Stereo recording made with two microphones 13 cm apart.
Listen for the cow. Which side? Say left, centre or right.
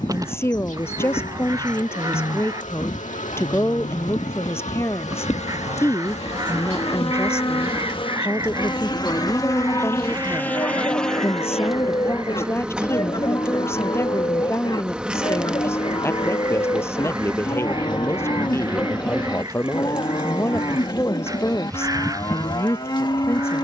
left.